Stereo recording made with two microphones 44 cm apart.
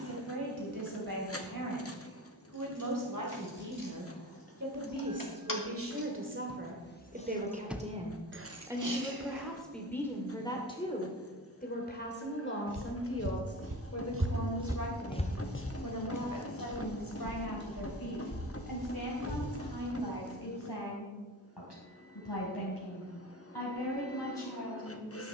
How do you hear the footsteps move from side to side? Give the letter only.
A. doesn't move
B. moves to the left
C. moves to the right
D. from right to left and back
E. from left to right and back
B.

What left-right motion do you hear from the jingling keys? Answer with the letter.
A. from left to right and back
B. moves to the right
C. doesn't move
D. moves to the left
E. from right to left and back
B.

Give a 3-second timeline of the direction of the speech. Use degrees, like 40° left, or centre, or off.
50° right, 40° right, 20° right, 10° left, 30° left, 50° left, 60° left, 60° left, 70° left.